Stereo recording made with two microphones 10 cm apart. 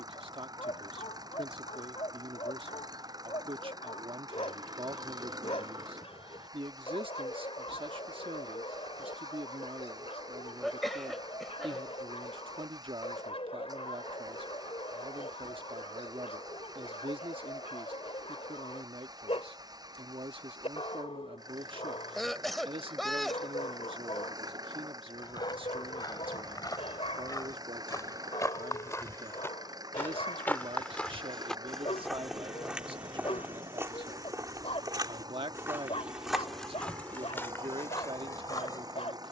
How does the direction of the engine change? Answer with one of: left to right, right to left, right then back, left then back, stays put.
stays put.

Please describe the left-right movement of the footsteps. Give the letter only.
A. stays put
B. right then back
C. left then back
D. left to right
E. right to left
B.